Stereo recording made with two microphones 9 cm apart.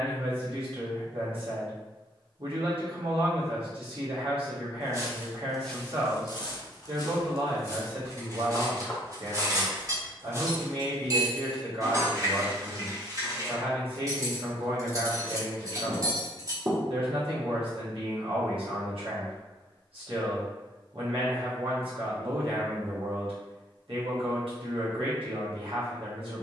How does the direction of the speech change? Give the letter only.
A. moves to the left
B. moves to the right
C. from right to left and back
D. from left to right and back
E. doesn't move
E.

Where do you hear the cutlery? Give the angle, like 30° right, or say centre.
40° right.